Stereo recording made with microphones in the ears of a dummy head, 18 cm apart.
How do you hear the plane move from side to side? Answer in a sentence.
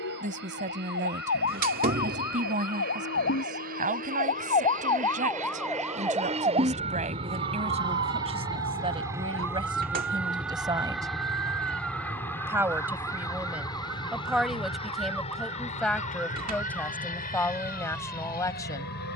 You can hear the plane travel towards the left.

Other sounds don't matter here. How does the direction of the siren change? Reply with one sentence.
You can hear the siren move from left to right.